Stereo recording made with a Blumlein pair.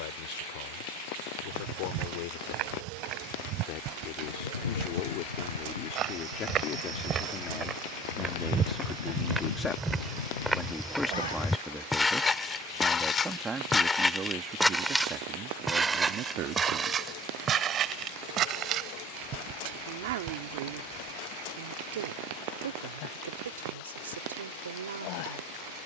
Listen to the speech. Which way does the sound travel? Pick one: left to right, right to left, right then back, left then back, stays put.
left to right.